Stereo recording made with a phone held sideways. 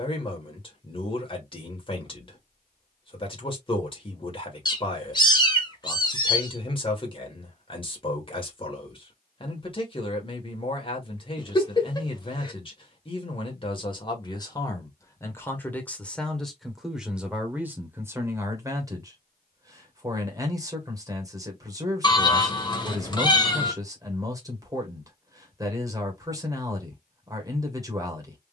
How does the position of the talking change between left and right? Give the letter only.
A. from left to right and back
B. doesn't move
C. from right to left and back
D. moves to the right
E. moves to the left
D.